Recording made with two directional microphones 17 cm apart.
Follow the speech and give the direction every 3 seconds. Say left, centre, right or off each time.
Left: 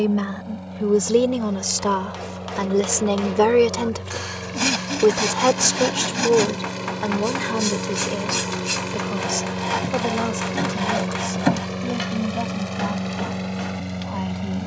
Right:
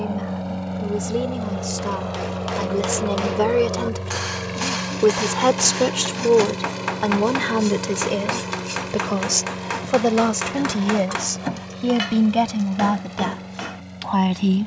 left, centre, right, right, right.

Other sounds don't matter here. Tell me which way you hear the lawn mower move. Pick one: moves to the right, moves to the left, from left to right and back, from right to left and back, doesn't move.
moves to the left.